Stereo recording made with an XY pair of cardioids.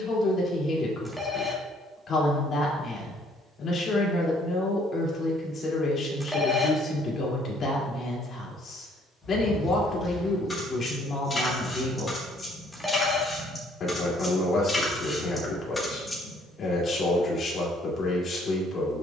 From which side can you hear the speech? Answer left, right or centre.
left.